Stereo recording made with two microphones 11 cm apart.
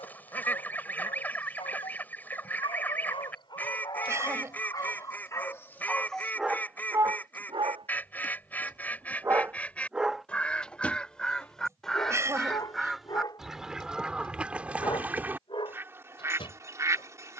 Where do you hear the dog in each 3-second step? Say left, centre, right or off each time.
left, left, right, centre, left, left.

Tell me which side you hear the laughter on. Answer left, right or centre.
right.